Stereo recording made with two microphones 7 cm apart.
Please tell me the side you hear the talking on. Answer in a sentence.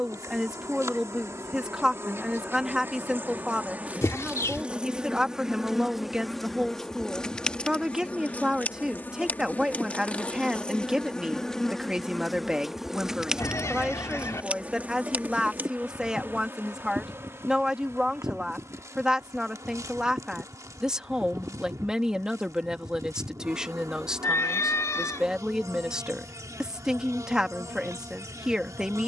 In this clip you hear the talking in the centre.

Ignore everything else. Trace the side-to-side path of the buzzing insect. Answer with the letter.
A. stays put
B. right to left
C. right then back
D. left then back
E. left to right
D.